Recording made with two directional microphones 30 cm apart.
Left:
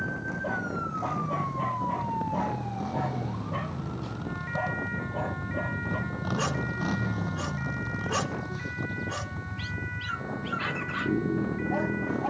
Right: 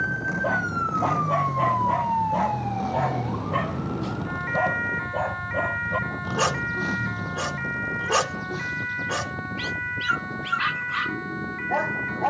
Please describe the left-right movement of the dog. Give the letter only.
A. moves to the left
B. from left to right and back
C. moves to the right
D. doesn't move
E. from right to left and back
D.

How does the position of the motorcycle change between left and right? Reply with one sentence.
You can hear the motorcycle move from right to left.